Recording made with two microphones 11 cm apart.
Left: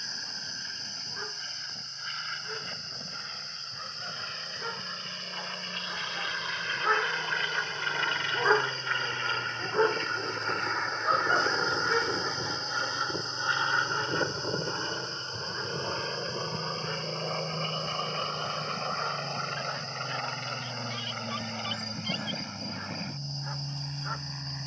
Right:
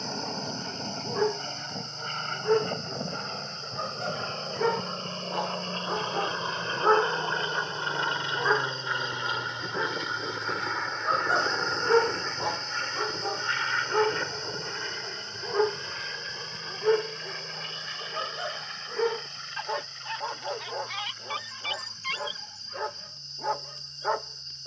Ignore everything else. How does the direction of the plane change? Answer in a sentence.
You can hear the plane go from the right side to the left.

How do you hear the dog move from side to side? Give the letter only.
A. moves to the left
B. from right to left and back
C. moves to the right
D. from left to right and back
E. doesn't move
B.